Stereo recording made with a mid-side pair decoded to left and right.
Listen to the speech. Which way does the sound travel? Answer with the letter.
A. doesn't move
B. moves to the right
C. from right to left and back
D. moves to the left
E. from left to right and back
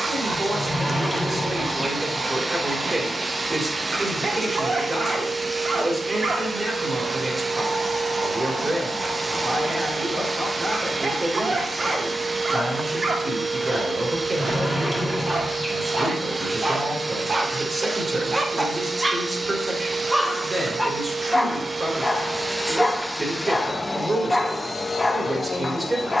A.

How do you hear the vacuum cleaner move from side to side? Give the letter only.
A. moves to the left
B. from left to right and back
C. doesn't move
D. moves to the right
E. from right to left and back
A.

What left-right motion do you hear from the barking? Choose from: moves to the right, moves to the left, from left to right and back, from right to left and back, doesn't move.
moves to the left.